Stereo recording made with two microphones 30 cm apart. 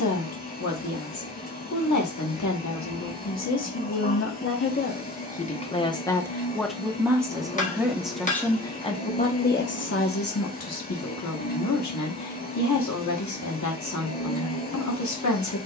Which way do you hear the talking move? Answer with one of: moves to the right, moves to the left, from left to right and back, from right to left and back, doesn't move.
from left to right and back.